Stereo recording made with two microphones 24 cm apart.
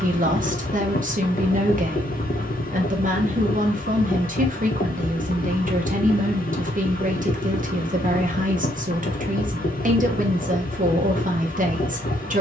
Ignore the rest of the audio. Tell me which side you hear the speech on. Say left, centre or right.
right.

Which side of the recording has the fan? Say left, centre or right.
left.